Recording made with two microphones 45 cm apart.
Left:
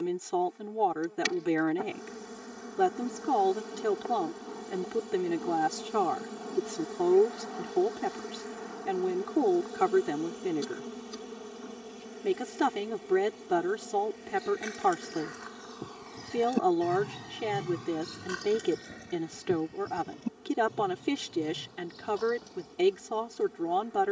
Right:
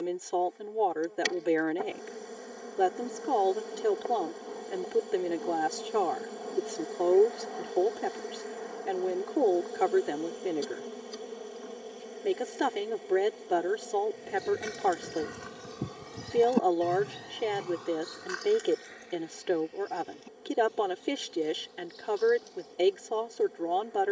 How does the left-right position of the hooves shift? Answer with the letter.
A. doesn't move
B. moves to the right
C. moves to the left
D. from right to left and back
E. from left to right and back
C.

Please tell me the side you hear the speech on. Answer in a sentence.
You can hear the speech on the left.